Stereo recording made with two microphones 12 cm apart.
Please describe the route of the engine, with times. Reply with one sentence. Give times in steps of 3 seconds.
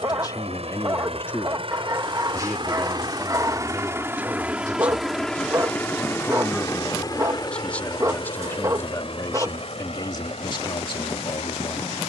In this clip you hear the engine on the right from 0 s, in the centre from 3 s and on the left from 6 s.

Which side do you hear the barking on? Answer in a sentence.
In this clip you hear the barking on the right.